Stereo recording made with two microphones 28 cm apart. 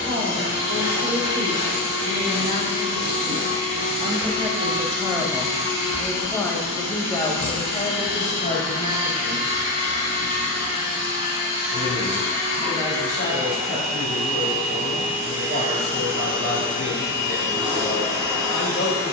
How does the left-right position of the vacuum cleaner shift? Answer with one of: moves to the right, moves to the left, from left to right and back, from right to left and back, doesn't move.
doesn't move.